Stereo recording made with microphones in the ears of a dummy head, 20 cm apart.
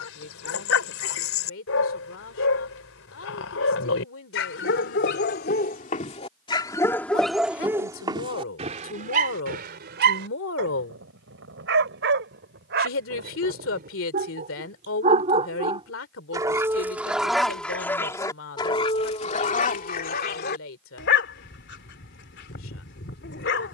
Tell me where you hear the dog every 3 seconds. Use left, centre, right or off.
left, left, centre, right, right, centre, left, left.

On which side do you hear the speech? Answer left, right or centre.
left.